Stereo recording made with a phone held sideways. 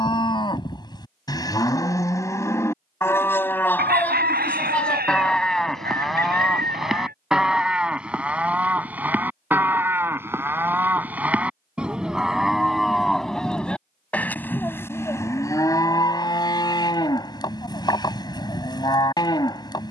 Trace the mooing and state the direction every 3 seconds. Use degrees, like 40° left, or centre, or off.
20° left, 10° left, centre, 10° right, centre, 20° left, 30° left.